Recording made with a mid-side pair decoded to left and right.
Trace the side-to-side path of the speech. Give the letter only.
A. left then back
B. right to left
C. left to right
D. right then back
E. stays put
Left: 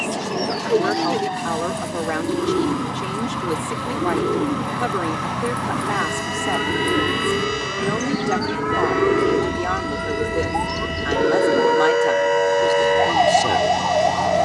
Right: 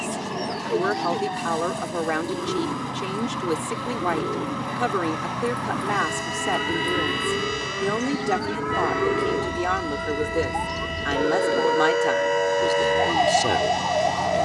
E.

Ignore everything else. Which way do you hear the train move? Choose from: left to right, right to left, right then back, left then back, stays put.
stays put.